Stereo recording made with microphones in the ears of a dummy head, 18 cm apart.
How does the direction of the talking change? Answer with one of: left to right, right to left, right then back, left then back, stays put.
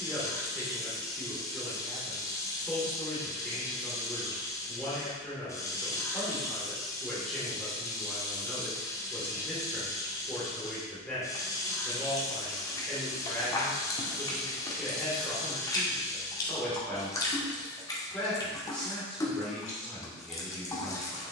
stays put.